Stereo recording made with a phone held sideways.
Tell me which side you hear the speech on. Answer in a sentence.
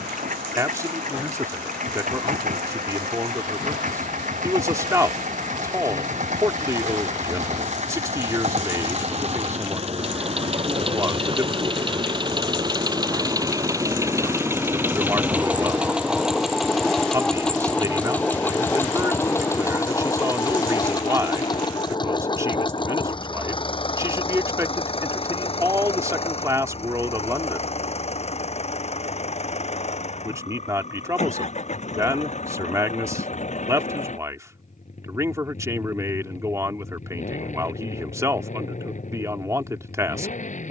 In this clip you hear the speech on the right.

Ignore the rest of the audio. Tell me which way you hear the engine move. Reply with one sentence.
You can hear the engine travel towards the left.